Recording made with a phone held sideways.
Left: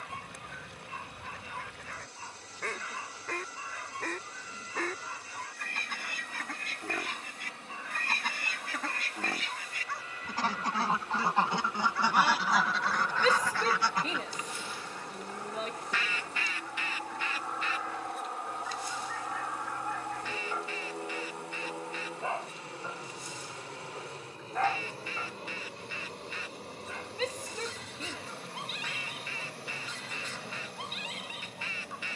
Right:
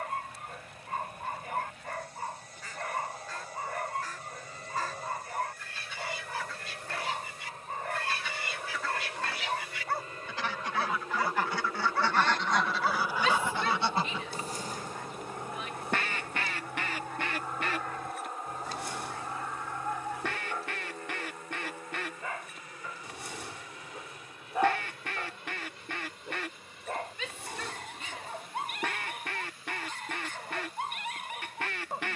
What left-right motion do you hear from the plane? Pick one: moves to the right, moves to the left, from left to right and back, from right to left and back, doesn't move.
moves to the left.